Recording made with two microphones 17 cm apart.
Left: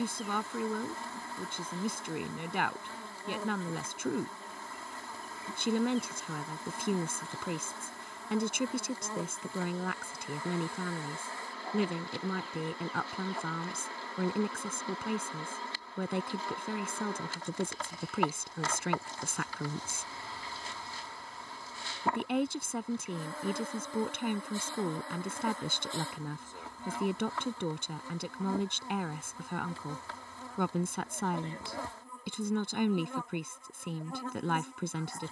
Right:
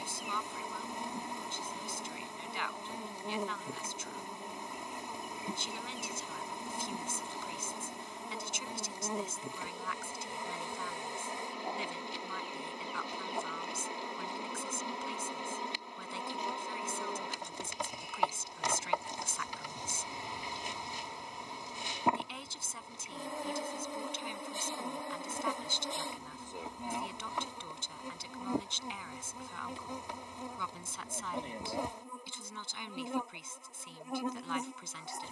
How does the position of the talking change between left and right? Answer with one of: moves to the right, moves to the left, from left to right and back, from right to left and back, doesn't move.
doesn't move.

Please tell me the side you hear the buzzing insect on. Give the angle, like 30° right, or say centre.
20° right.